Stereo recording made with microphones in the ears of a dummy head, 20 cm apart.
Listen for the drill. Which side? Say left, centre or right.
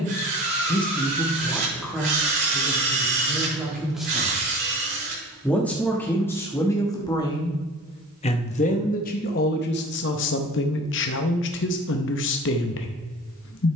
right.